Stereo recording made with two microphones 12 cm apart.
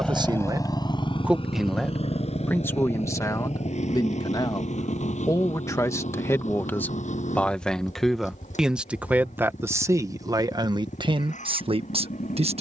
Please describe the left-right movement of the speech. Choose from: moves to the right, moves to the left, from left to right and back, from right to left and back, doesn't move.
from right to left and back.